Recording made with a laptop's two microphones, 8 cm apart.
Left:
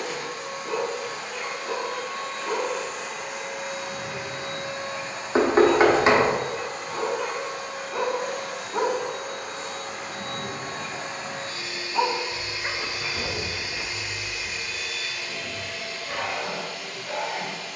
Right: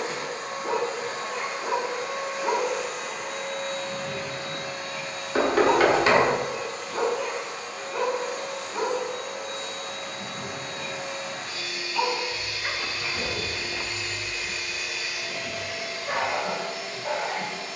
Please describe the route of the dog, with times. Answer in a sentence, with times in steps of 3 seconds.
You can hear the dog on the right from 0 s, in the centre from 6 s, on the left from 9 s, in the centre from 12 s and on the right from 15 s.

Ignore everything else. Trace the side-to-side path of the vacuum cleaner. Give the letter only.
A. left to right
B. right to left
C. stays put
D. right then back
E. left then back
E.